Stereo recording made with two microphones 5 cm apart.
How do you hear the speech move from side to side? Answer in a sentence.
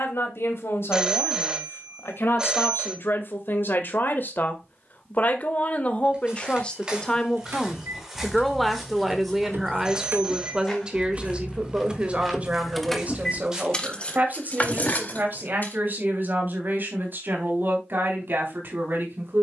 You can hear the speech move from left to right.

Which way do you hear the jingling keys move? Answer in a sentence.
In this clip you hear the jingling keys travel towards the left.